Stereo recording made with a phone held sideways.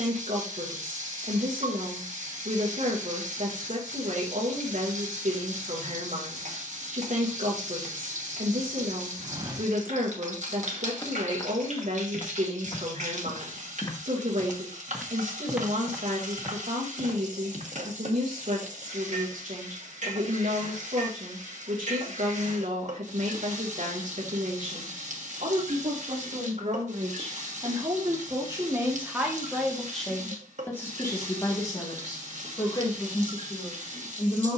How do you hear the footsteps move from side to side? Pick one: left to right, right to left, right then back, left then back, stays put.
left then back.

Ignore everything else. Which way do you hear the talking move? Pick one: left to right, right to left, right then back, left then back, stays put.
right to left.